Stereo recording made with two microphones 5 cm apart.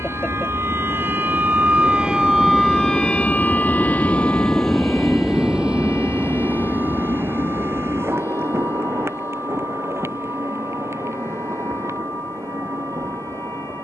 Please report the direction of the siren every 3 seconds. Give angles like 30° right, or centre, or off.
30° right, 40° left, 60° left, 70° left, 70° left.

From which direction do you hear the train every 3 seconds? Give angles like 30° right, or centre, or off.
60° left, 10° left, 50° right, 60° right, 70° right.